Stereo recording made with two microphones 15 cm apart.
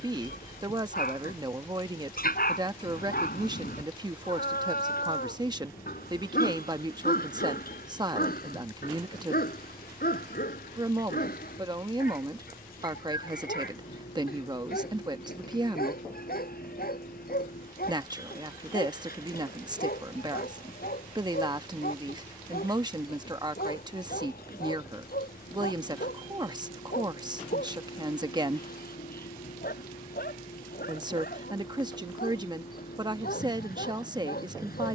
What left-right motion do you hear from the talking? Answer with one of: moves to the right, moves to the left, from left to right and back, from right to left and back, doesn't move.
doesn't move.